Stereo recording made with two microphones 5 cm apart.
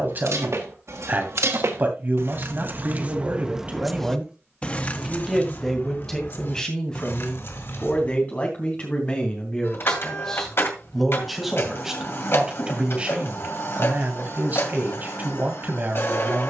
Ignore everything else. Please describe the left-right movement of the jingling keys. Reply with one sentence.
In this clip you hear the jingling keys move to the left.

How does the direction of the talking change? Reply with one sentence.
In this clip you hear the talking go left and come back.